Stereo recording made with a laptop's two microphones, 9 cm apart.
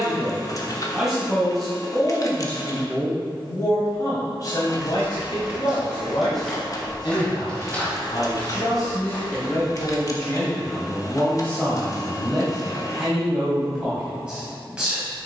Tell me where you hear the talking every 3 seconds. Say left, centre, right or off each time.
centre, left, left, left, centre.